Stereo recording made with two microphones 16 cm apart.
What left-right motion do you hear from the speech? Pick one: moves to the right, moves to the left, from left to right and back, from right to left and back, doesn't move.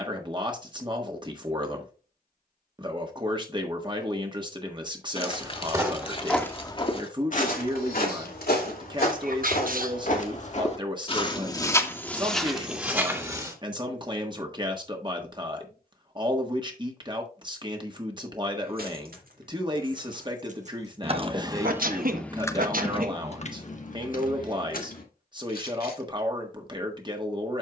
doesn't move.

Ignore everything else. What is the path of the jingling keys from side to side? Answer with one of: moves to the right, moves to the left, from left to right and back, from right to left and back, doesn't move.
moves to the left.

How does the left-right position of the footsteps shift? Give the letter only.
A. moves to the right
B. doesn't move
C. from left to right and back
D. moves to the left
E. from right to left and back
E.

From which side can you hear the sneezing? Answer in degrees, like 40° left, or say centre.
60° right.